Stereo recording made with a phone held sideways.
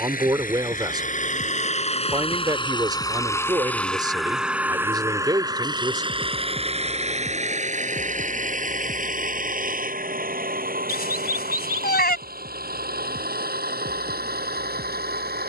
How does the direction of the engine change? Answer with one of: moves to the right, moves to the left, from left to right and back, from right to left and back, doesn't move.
moves to the right.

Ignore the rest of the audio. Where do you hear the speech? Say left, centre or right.
right.